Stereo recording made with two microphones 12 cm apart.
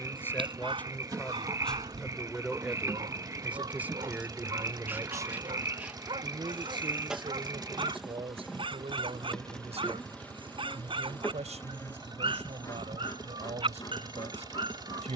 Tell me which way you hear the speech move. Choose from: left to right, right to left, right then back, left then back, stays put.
left to right.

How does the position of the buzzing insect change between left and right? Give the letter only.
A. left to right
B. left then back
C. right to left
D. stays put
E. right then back
C.